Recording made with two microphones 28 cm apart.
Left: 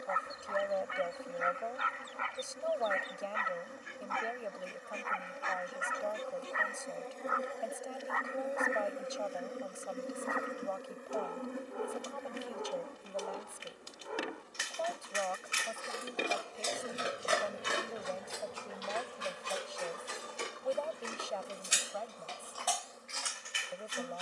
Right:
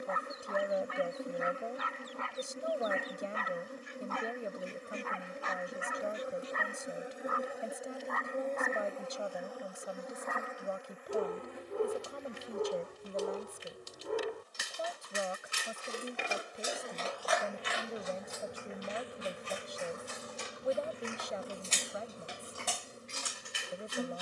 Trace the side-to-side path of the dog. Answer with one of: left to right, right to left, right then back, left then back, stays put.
left then back.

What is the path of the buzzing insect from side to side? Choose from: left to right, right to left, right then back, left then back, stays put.
left then back.